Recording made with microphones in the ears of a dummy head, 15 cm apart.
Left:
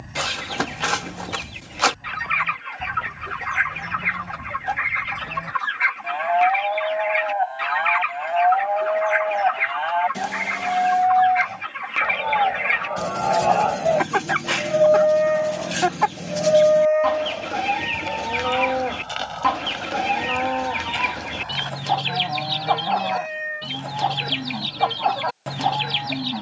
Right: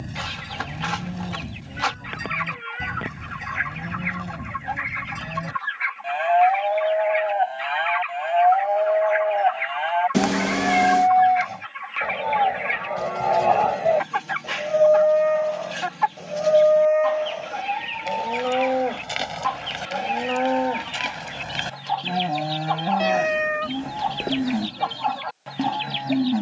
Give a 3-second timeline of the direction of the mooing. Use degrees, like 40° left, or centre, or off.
40° right, 30° right, 20° right, 20° right, centre, centre, 20° right, 30° right, 30° right.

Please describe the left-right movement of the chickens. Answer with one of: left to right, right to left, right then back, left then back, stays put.
stays put.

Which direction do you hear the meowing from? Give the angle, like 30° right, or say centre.
70° right.